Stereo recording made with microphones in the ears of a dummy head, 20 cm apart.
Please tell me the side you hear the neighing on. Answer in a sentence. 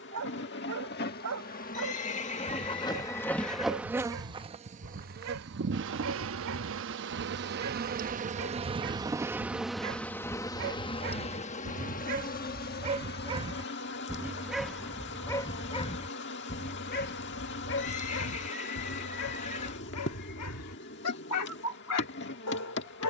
You can hear the neighing on the left.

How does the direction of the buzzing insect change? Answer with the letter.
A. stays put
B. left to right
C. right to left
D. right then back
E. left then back
D.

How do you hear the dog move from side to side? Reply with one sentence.
In this clip you hear the dog move from right to left.